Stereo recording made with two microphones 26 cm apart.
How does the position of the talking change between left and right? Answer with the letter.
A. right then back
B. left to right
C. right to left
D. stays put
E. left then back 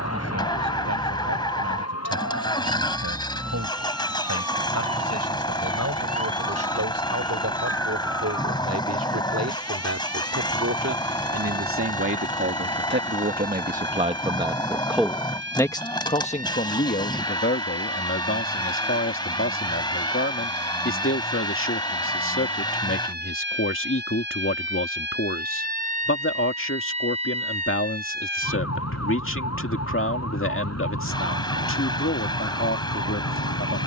C.